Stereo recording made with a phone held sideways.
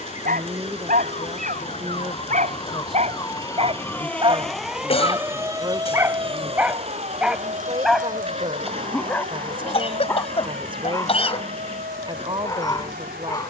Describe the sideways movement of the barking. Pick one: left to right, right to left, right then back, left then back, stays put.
right to left.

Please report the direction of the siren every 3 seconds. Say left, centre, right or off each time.
left, centre, right, right, right.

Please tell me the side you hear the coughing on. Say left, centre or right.
left.